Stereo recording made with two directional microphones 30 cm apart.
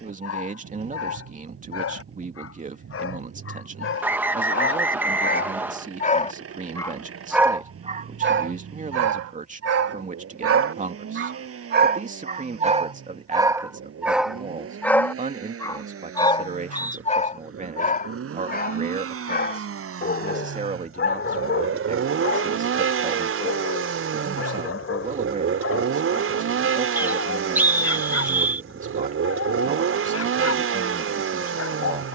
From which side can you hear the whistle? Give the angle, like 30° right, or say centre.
10° right.